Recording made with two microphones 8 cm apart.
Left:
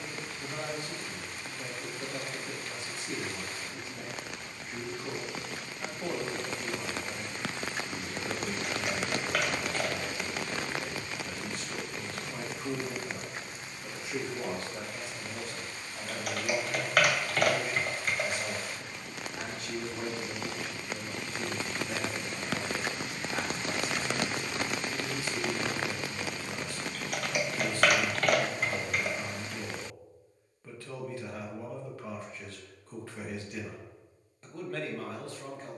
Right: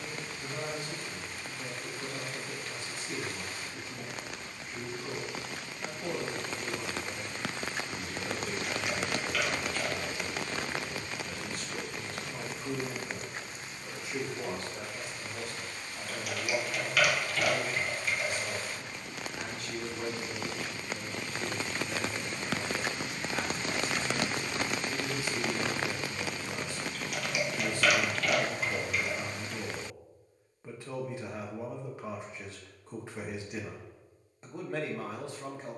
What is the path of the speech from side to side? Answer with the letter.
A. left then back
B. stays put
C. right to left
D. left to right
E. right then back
D.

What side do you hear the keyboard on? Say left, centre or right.
left.